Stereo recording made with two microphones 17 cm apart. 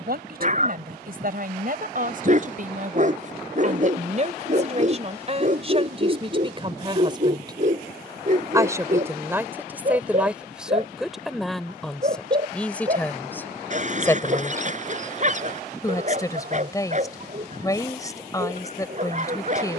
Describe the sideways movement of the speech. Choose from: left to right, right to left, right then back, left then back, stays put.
right to left.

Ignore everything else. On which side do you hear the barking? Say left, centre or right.
right.